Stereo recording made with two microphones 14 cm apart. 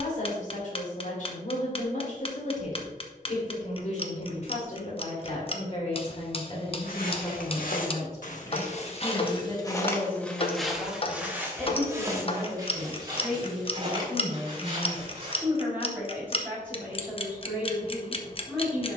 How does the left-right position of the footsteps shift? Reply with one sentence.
In this clip you hear the footsteps go from the left side to the right.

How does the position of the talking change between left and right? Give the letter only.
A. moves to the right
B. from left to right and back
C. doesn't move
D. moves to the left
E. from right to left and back
A.